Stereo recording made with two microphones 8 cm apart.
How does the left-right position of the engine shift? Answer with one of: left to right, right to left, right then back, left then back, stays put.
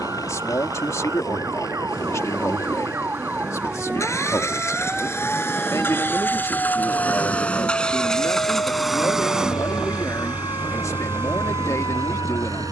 left to right.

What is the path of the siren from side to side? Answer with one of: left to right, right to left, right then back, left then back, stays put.
right to left.